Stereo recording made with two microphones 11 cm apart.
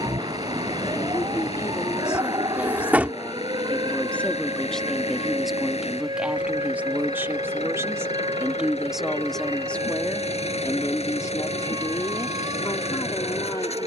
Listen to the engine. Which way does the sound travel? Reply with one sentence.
You can hear the engine stay in one place.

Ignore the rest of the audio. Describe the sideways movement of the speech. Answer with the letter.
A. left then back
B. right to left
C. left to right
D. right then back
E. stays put
D.